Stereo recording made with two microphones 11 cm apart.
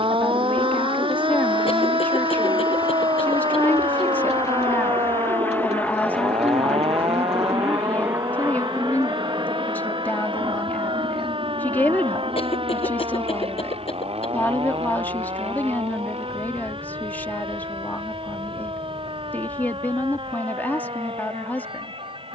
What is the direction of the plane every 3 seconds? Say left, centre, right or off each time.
left, left, centre, right, right, right, right, right.